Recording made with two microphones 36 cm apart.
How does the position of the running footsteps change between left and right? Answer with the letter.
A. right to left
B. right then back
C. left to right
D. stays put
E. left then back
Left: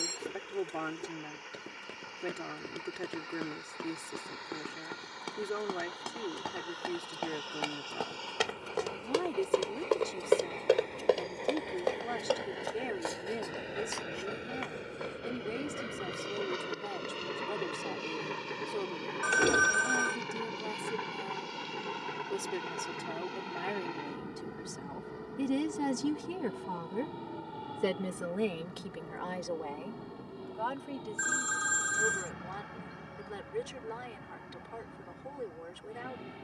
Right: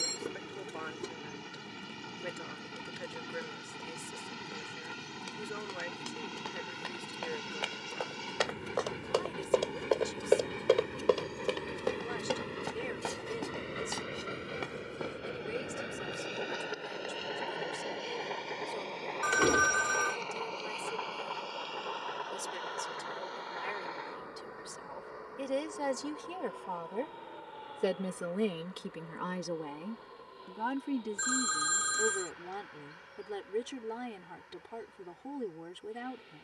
C.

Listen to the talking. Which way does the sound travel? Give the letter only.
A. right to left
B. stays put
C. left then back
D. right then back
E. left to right
E.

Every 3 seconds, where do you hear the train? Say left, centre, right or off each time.
right, right, right, right, centre, centre, left, left, left, left, left, left.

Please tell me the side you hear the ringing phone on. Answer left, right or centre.
centre.